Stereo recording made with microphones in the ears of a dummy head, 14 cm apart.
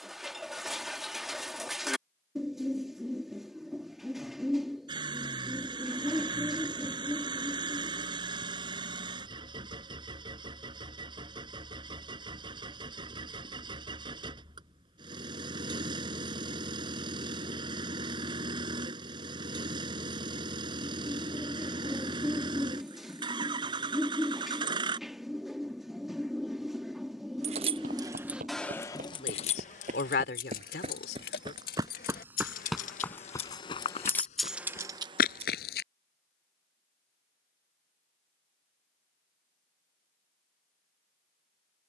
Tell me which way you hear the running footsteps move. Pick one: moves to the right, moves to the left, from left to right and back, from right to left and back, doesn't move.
moves to the left.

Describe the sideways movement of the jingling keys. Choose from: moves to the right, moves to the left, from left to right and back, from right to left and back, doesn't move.
from right to left and back.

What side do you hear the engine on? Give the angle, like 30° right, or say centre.
30° right.